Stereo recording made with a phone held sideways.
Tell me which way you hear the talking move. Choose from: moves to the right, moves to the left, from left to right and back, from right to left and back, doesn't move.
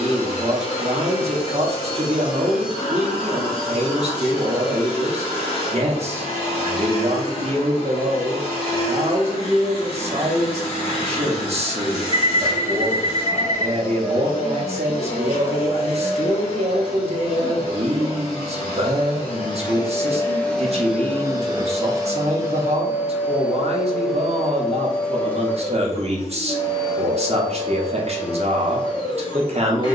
doesn't move.